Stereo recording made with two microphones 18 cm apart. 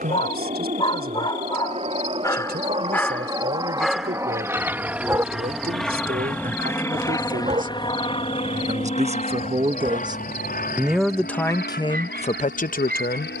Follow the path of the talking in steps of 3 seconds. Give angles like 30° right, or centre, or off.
60° right, 60° right, 50° right, 10° right, 50° left.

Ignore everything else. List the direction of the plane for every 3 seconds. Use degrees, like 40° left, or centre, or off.
40° right, 10° right, 20° left, 50° left, 60° left.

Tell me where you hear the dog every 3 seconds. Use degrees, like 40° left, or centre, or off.
30° left, 10° right, 40° right, 50° right, 60° right.